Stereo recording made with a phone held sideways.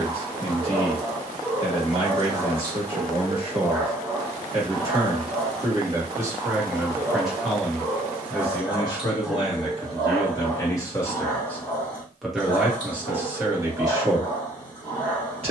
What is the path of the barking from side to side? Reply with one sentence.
In this clip you hear the barking go from the right side to the left.